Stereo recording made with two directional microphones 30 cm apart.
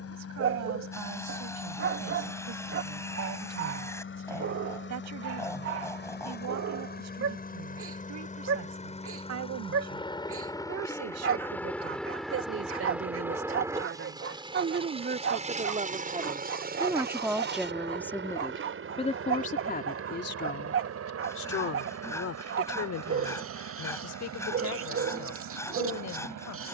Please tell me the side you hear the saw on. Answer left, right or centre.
centre.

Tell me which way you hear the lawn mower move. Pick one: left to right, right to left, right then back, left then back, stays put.
left to right.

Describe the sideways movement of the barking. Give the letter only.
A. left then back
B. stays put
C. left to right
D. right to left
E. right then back
B.